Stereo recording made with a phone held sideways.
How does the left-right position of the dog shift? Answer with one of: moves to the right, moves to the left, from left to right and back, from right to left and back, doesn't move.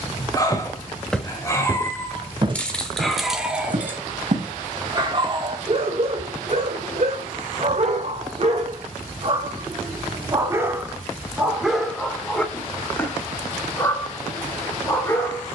from left to right and back.